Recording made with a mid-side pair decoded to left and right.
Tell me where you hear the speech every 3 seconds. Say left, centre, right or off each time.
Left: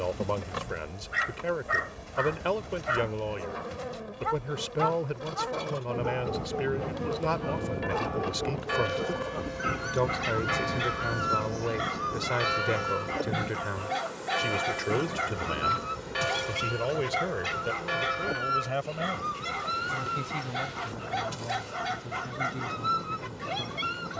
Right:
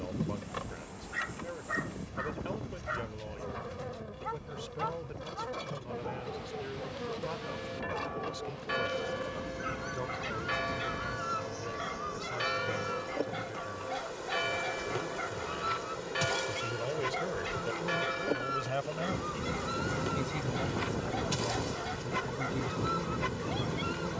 left, left, left, left, left, left, centre, centre.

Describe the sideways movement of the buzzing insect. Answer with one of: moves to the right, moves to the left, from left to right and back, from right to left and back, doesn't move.
moves to the right.